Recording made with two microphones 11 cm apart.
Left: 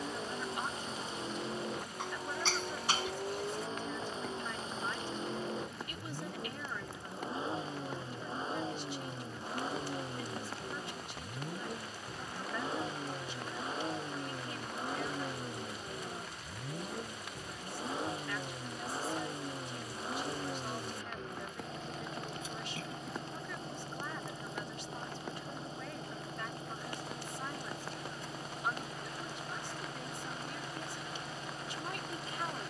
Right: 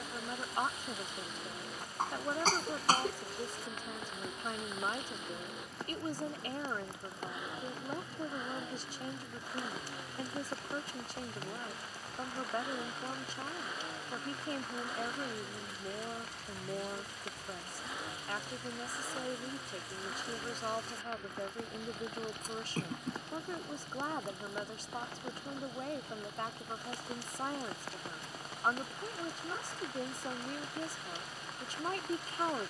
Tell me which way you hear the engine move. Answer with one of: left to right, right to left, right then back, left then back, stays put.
stays put.